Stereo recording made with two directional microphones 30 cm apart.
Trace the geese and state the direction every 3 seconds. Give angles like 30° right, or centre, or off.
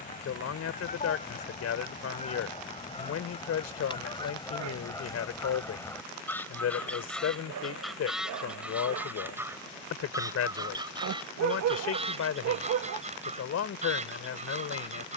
20° left, 10° left, centre, 10° right, 20° right.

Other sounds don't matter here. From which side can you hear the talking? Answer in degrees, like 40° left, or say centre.
60° left.